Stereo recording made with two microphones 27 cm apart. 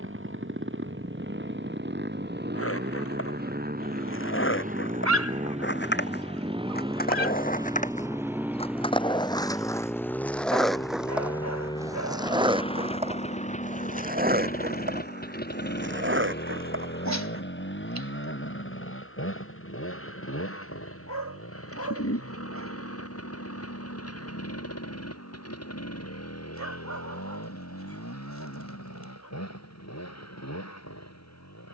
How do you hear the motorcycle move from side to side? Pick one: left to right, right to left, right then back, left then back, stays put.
right to left.